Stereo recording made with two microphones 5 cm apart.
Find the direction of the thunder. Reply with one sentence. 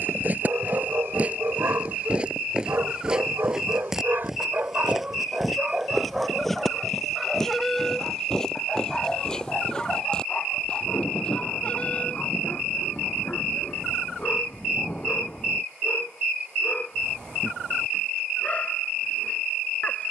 In this clip you hear the thunder on the left.